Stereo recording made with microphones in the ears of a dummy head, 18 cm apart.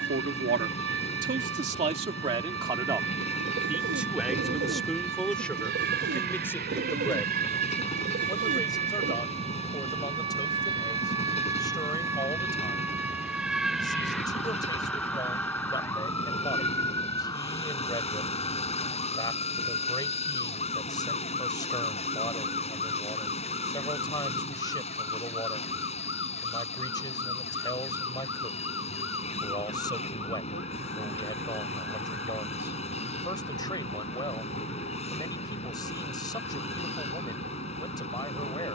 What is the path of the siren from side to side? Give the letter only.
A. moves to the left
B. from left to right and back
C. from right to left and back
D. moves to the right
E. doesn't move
A.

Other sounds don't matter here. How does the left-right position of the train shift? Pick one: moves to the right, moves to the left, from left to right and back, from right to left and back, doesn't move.
doesn't move.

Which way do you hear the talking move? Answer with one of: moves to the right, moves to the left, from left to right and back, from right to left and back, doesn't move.
moves to the left.